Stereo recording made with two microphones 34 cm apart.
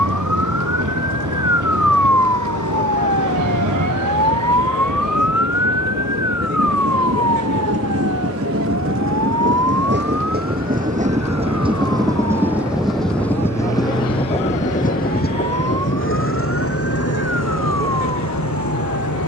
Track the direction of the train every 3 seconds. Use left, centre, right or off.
right, right, right, right, centre, left, left.